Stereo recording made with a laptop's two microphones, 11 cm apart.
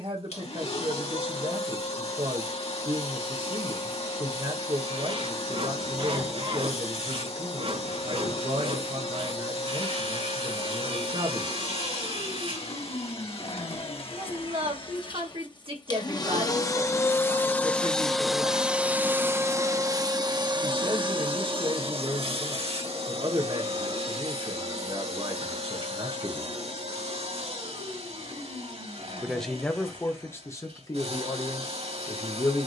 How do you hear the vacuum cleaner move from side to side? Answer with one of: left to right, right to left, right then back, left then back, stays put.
left to right.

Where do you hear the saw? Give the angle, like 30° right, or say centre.
60° right.